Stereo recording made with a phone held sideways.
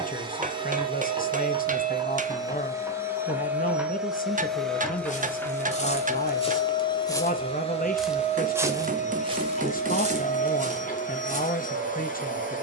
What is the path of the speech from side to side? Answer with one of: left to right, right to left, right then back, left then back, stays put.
stays put.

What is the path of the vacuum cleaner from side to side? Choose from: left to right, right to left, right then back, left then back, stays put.
right to left.